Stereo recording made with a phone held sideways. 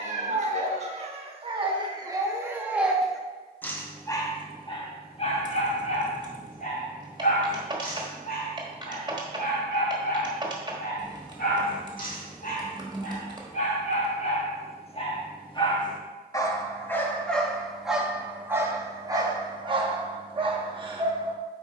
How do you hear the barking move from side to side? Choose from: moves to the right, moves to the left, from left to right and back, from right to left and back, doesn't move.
from right to left and back.